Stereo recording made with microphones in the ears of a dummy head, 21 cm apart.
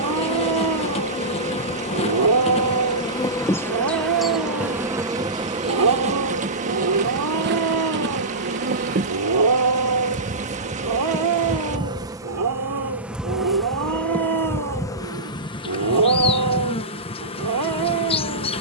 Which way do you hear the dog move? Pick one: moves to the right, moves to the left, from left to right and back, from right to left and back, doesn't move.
doesn't move.